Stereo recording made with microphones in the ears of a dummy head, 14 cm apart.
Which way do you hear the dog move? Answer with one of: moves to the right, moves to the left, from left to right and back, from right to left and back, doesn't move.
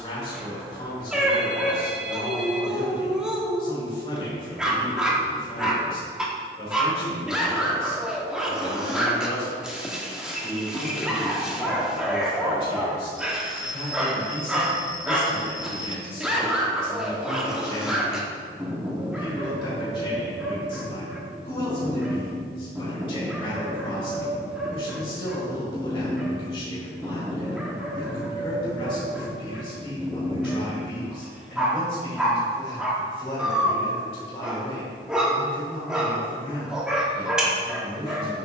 doesn't move.